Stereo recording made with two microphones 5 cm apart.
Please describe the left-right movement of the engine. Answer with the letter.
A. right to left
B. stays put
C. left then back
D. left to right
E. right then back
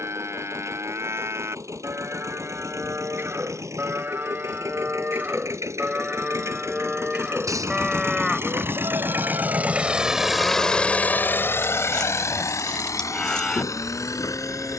A.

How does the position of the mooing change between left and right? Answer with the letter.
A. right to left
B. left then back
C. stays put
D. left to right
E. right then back
A.